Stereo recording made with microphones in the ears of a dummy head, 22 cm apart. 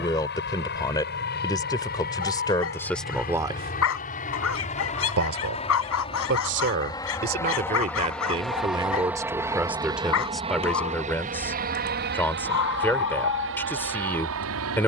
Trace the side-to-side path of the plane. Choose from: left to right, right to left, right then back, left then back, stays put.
left to right.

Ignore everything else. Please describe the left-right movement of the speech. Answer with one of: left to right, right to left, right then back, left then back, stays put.
right then back.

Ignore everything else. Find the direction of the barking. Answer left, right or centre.
left.